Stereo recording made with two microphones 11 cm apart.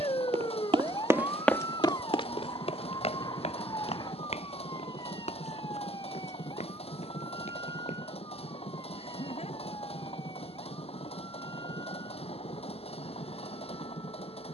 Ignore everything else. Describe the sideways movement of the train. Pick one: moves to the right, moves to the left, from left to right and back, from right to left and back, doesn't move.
doesn't move.